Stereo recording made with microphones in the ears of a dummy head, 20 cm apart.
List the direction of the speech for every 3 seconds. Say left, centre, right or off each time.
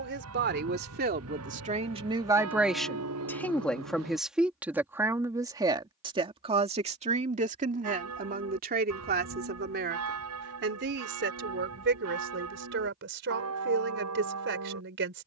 right, centre, right, right, right.